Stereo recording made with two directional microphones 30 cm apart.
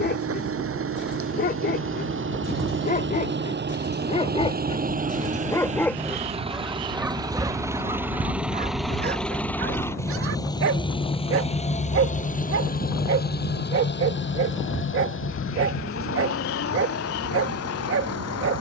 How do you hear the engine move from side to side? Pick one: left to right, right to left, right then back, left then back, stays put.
right to left.